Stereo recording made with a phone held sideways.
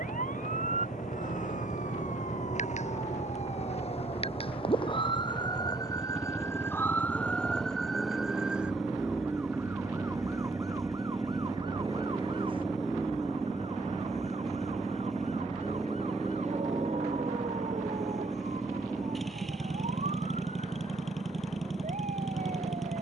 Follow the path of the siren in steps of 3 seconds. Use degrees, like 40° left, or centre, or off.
60° left, 40° left, 10° left, 20° right, 40° right, 50° right, 50° right, 60° right.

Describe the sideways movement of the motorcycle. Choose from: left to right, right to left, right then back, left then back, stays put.
stays put.